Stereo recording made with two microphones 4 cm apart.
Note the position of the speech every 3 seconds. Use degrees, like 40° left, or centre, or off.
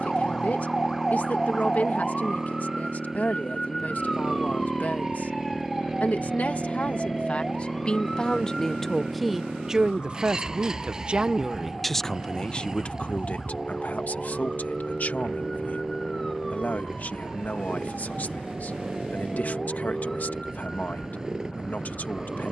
40° left, 40° left, 30° left, 20° right, 30° left, 40° left, 40° left, 40° left.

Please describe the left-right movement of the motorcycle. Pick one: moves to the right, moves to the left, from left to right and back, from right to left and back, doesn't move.
doesn't move.